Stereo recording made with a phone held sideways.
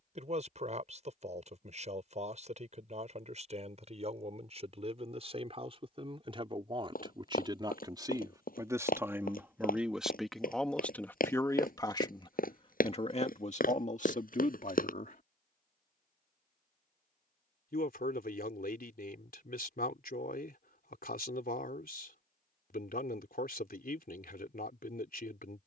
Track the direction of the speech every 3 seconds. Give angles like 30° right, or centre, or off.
50° right, 50° right, 30° right, centre, 50° left, 70° left, 80° left, 80° left, 80° left.